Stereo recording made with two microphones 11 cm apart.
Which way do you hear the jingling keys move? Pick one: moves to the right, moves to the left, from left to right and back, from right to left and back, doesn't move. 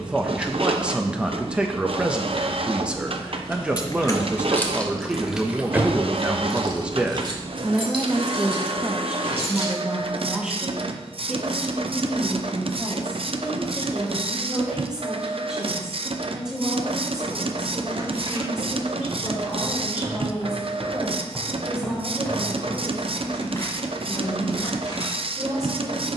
moves to the right.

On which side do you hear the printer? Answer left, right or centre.
right.